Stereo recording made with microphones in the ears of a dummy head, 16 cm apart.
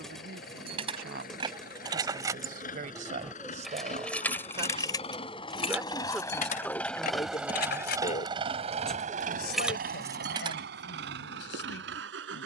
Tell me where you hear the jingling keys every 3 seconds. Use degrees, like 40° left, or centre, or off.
30° right, 10° left, 50° left, 20° right.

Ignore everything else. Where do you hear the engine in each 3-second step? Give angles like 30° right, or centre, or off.
50° left, 40° left, 10° right, 60° right.